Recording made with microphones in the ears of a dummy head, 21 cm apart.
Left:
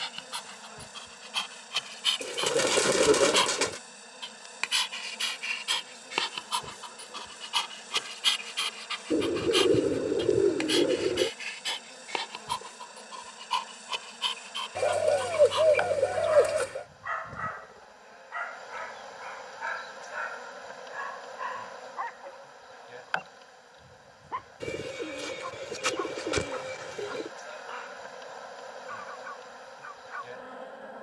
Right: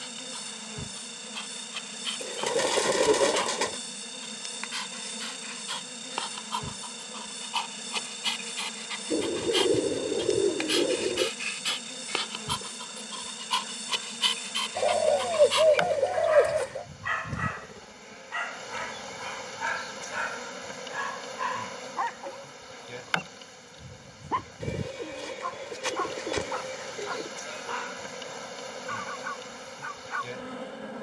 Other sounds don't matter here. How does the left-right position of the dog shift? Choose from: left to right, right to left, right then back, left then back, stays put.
left to right.